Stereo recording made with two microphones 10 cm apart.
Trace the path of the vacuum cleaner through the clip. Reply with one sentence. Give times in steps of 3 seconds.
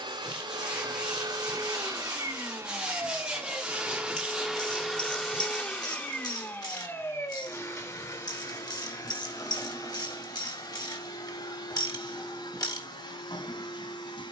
You can hear the vacuum cleaner on the right from 0 s, in the centre from 3 s and on the left from 6 s.